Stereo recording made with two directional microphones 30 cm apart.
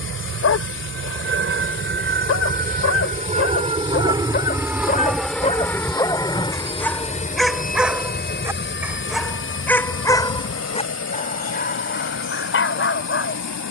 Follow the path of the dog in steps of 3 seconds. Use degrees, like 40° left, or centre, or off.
50° left, 30° left, centre, 20° left, 40° left.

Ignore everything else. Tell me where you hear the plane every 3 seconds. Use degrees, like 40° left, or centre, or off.
40° right, 10° right, 20° left, 40° left, 50° left.